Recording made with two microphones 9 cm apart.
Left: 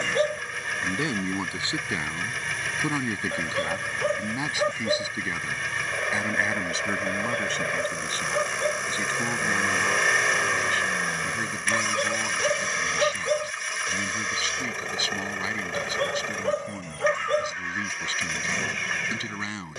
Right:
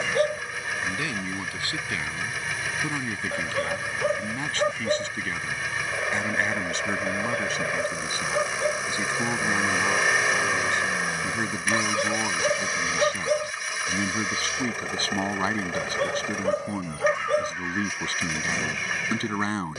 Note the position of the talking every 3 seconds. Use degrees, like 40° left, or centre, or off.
20° left, 10° left, centre, 20° right, 30° right, 40° right, 40° right.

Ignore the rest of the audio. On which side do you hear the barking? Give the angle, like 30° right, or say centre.
centre.